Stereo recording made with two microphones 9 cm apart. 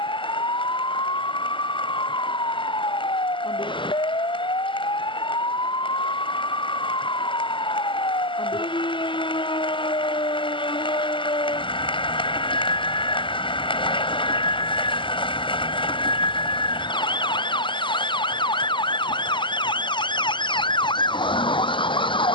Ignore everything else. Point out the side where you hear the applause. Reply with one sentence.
You can hear the applause on the left.